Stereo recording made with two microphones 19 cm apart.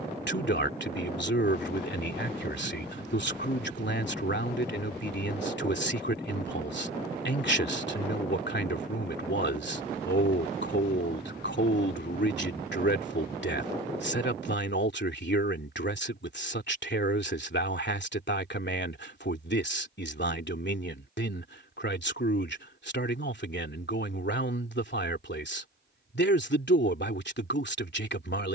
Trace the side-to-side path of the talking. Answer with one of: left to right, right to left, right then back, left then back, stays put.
stays put.